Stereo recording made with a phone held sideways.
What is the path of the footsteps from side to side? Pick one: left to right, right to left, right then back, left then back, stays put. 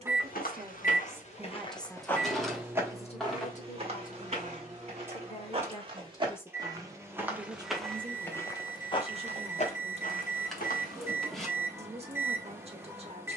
right then back.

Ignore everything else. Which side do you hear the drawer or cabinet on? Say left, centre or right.
centre.